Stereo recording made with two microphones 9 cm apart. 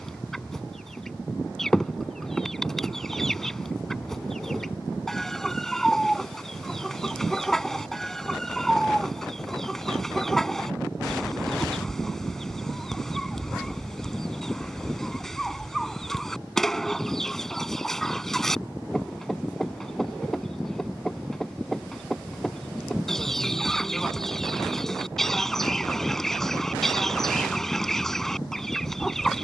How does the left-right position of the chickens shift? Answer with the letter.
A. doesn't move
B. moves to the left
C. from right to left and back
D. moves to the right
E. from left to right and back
A.